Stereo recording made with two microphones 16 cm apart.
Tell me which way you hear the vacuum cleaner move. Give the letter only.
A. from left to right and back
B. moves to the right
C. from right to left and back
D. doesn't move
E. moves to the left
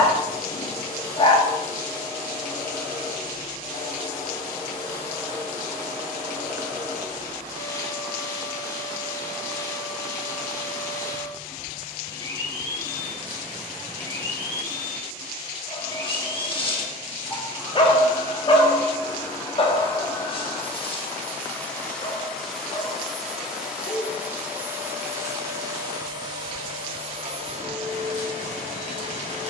B.